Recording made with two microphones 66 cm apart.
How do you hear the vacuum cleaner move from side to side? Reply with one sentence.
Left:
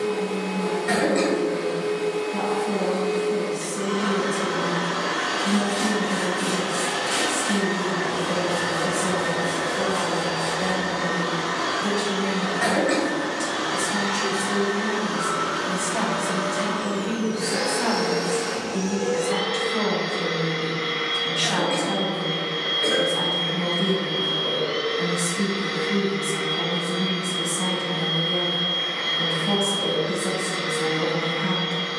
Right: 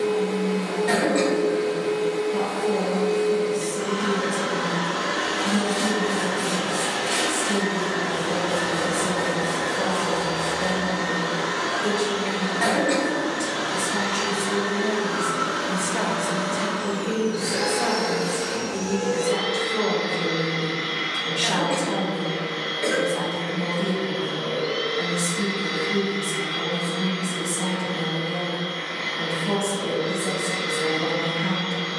In this clip you hear the vacuum cleaner stay in one place.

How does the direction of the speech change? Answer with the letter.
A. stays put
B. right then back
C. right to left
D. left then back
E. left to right
D.